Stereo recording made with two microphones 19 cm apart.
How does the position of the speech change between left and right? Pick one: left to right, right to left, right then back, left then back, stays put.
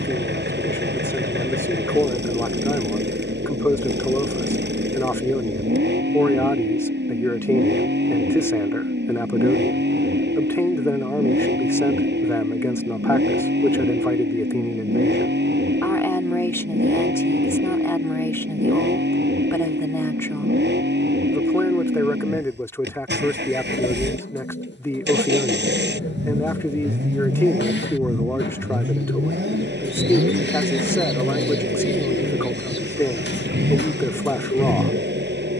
stays put.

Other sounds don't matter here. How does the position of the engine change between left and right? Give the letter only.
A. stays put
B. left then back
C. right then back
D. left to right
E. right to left
A.